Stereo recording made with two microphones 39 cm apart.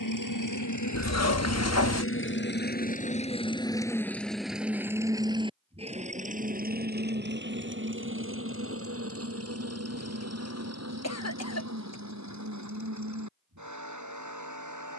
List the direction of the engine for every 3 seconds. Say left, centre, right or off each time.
left, centre, right, right, right.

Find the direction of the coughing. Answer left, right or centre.
left.